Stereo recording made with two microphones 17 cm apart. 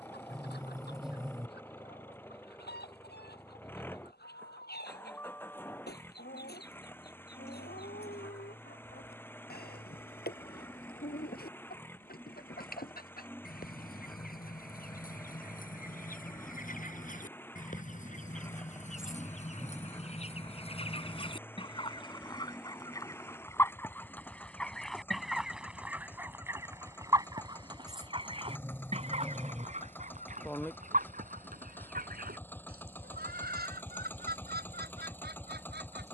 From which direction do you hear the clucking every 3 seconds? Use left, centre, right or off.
left, left, left, left, left, left, left, left, centre, right, right, right.